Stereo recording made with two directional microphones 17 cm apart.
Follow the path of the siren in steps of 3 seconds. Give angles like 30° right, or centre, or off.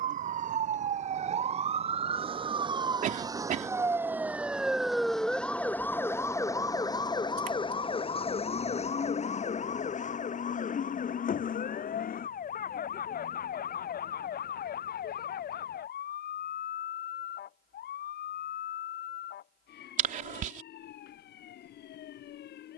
40° right, 10° right, 30° left, 50° left, 60° left, 60° left, 70° left, 70° left.